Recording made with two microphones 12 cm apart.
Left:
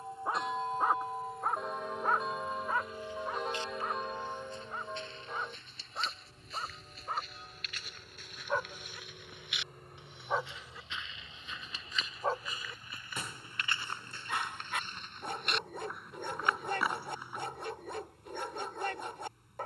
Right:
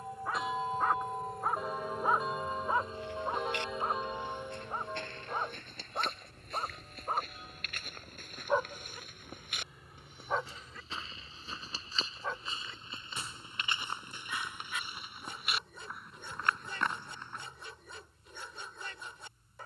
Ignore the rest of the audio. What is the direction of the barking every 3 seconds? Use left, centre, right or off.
centre, right, right, centre, left, left, left.